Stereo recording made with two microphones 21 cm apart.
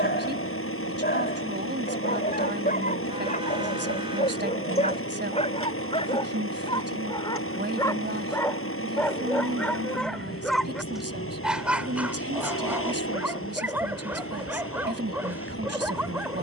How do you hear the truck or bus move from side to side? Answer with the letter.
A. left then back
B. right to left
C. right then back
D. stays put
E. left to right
D.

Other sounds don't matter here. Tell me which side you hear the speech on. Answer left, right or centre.
right.